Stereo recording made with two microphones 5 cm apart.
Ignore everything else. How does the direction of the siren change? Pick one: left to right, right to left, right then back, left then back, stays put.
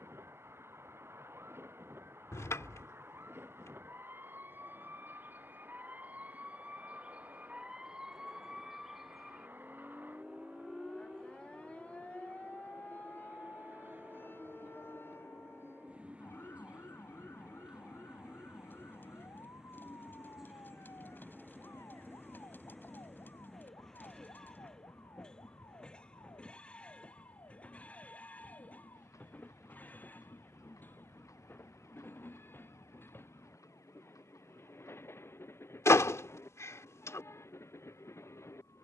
right to left.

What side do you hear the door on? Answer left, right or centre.
left.